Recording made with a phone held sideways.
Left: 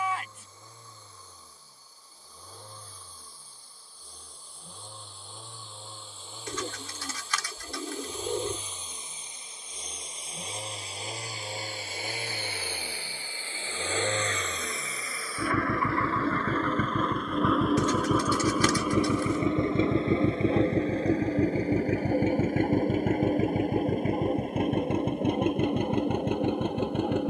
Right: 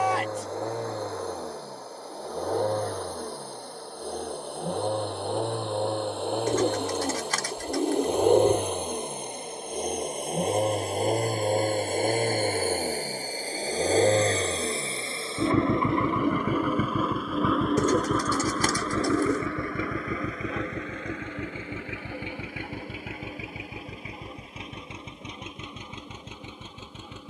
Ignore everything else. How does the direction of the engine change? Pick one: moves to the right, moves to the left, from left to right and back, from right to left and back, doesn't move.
moves to the left.